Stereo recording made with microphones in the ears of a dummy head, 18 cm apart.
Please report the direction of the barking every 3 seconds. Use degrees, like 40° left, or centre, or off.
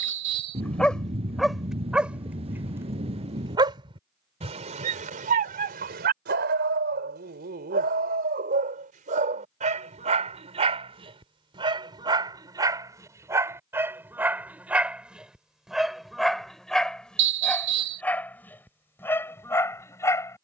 centre, 40° right, 50° right, 30° right, 10° right, centre, 10° left.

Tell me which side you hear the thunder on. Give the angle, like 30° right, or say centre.
30° right.